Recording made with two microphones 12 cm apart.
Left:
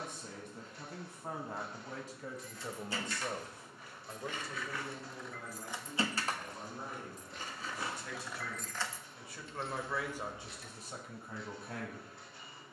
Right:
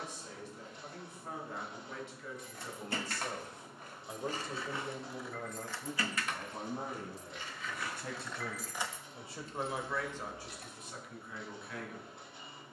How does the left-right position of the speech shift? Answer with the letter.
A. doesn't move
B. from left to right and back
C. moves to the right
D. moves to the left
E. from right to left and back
B.